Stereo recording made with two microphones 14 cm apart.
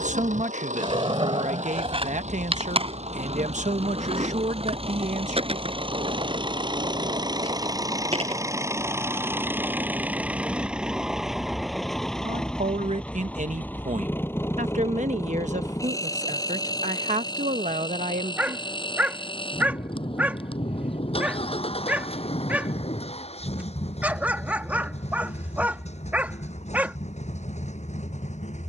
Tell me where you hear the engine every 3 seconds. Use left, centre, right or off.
right, right, right, centre, centre, left, left, left, left, left.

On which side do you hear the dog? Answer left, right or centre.
centre.